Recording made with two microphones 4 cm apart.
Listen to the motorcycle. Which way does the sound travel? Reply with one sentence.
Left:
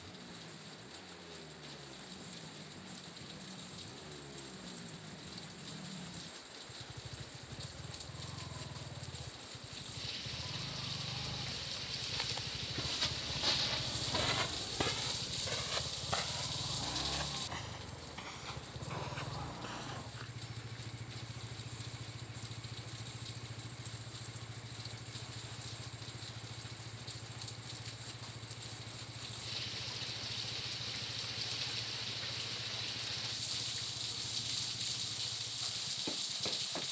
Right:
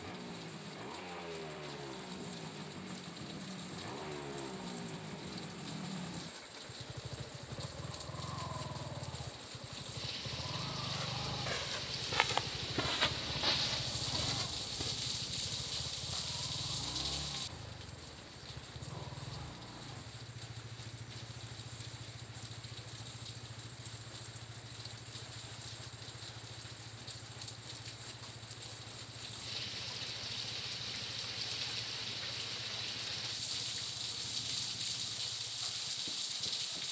In this clip you hear the motorcycle move from right to left.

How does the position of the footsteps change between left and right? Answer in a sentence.
You can hear the footsteps move from right to left.